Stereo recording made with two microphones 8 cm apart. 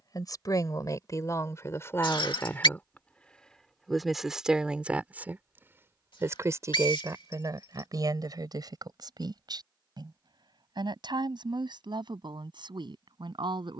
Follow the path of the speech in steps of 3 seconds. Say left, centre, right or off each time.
left, centre, right, right, right.